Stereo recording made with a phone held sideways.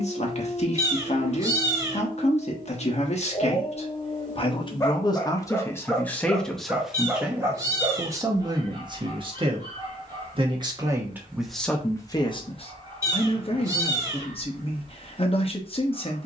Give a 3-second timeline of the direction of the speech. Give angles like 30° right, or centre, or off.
40° left, 30° left, 10° right, 20° right, 40° left, 40° left.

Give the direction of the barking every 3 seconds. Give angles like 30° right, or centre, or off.
40° left, 20° left, 20° right, 30° right, 30° right, 30° right.